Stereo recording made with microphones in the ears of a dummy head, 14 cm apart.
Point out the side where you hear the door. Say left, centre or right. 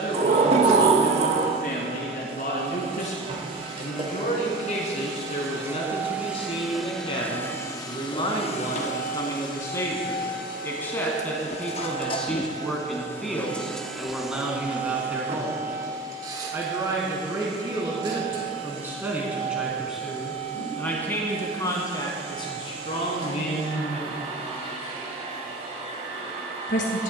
right.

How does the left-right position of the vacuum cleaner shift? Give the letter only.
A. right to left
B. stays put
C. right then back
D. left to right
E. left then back
E.